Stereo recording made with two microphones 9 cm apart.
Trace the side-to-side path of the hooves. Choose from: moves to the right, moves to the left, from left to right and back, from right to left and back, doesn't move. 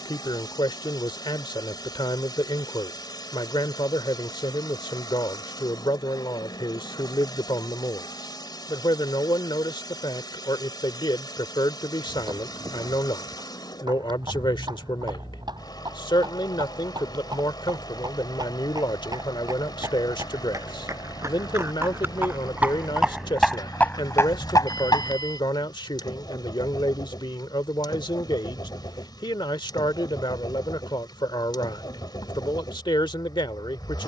moves to the left.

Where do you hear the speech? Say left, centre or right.
left.